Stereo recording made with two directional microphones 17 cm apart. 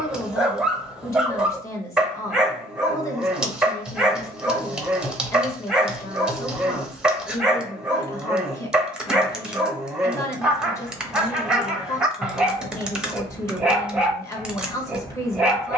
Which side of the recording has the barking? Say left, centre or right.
centre.